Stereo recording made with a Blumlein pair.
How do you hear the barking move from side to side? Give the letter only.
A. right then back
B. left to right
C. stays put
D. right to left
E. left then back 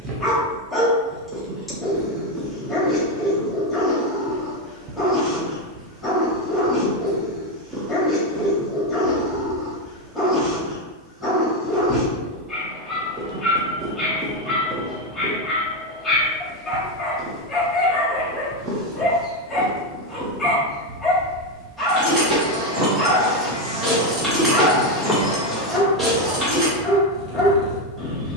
C.